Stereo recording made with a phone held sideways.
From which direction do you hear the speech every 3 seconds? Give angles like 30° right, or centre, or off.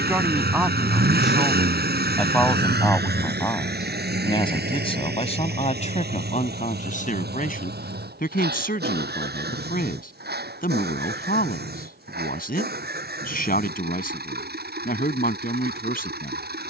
centre, 30° left, 60° left, 60° left, 60° left, 60° left.